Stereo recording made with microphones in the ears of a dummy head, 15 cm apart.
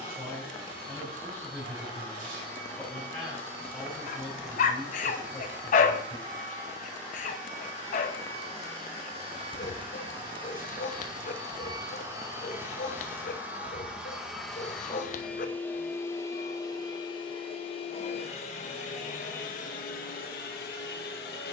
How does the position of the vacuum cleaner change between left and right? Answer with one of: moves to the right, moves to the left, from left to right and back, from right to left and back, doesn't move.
moves to the left.